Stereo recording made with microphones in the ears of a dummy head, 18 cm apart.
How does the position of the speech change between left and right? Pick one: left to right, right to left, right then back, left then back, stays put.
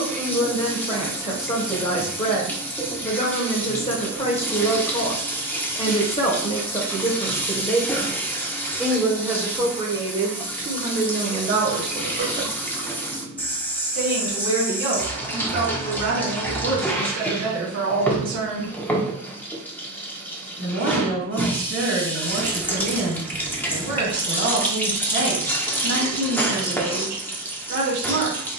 left to right.